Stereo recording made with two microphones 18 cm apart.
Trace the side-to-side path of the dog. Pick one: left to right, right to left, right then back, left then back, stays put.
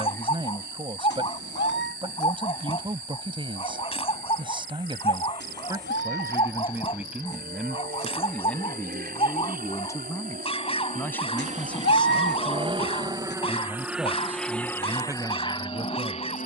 stays put.